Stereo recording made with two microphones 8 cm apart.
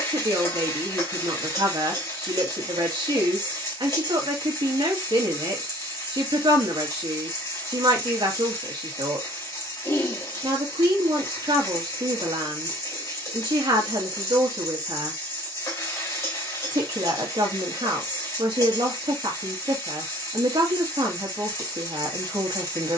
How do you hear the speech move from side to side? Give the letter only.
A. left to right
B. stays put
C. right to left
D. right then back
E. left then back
B.